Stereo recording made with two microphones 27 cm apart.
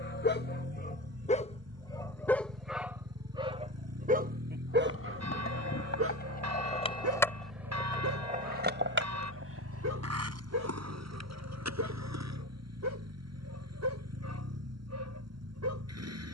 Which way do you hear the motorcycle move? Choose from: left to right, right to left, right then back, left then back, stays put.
stays put.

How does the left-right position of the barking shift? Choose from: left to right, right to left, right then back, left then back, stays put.
left to right.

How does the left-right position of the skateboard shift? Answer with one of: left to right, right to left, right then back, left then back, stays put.
left to right.